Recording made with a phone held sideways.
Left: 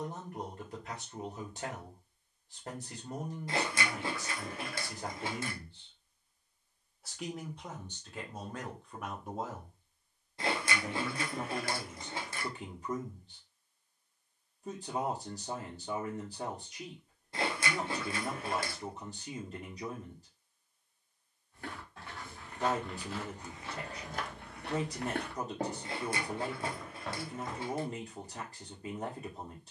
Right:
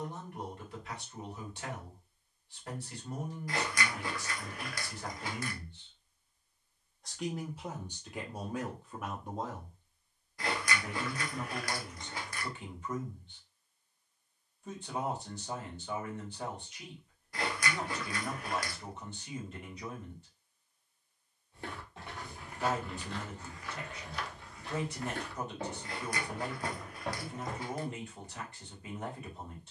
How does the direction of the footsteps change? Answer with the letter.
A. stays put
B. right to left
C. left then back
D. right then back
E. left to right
C.